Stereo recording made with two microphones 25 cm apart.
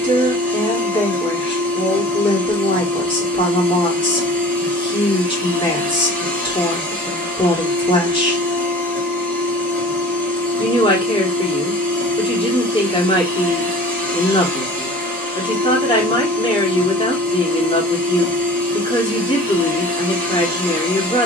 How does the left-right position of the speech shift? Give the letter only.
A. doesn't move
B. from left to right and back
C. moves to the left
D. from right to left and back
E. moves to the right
A.